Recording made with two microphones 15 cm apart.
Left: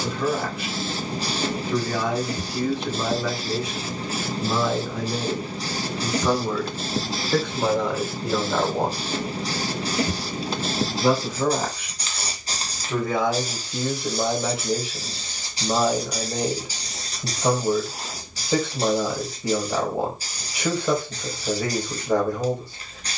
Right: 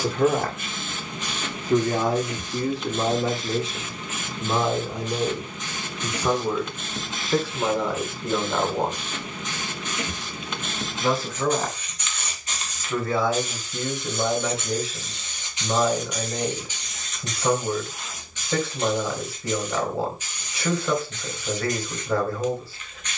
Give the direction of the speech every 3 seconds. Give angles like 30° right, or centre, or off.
40° right, 20° right, centre, 10° left, 20° left, 20° left, 20° left, 20° left.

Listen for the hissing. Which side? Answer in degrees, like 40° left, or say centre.
30° left.